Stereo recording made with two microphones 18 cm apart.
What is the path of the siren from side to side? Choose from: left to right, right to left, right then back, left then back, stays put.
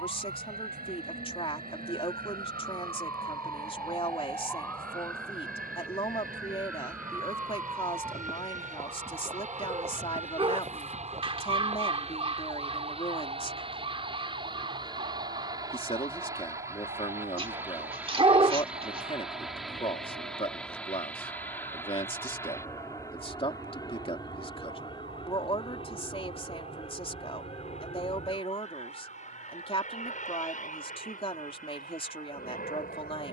left to right.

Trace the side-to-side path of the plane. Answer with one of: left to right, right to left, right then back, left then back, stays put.
right to left.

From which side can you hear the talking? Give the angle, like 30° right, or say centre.
30° left.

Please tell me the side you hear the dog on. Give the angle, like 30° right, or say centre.
30° right.